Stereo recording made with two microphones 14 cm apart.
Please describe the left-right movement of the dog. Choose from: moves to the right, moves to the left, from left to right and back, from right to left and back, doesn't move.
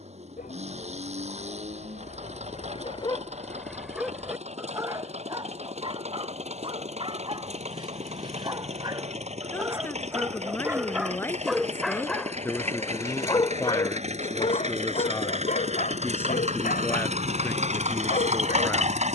from left to right and back.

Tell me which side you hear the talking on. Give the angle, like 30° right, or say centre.
20° left.